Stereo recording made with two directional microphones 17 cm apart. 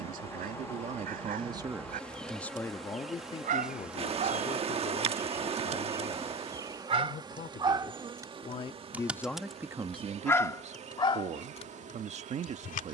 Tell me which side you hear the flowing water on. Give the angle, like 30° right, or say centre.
40° right.